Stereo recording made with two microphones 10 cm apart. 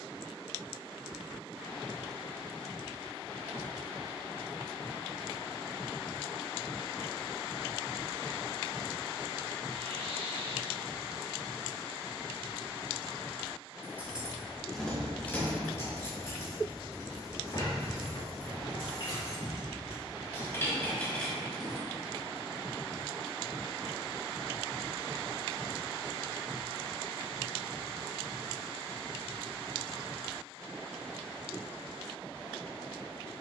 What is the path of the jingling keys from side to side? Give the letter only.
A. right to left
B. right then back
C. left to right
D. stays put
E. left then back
E.